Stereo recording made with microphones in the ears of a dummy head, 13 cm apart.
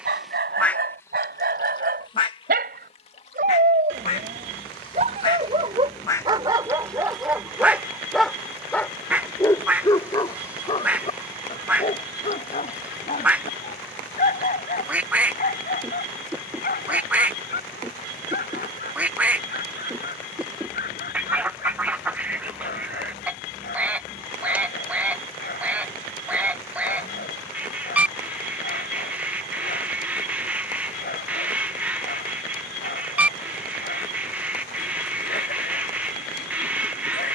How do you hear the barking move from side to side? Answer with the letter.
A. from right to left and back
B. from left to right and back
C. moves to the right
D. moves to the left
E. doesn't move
D.